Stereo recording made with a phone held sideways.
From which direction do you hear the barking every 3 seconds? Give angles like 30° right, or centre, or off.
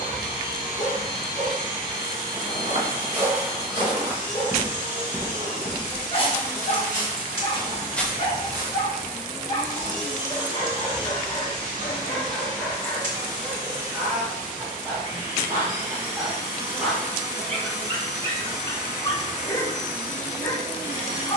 30° left, 30° left, 30° left, 30° left, centre, 10° right, 20° left.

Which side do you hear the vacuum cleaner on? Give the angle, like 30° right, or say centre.
30° right.